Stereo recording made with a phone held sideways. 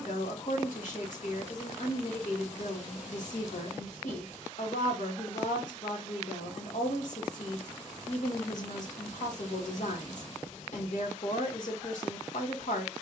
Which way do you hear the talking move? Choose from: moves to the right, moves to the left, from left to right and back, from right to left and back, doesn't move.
doesn't move.